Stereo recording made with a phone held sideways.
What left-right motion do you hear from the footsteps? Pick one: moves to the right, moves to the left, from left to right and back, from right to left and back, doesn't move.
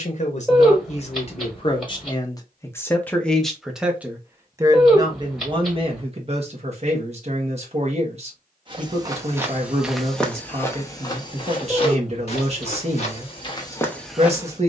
from right to left and back.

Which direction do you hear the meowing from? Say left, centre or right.
centre.